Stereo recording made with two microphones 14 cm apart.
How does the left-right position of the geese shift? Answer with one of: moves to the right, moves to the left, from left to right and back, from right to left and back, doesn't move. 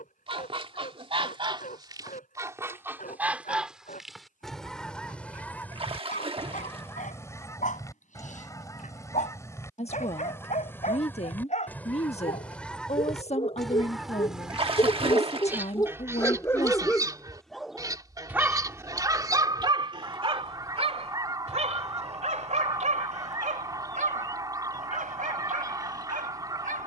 from right to left and back.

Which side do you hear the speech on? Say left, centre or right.
left.